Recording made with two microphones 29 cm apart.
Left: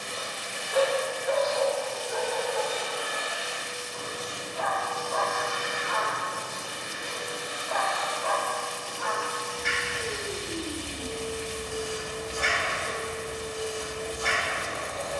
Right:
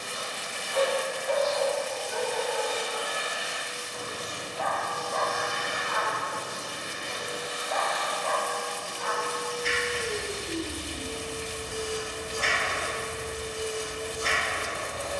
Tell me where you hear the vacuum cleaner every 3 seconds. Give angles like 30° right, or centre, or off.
60° left, 60° left, 40° left, centre, 30° right.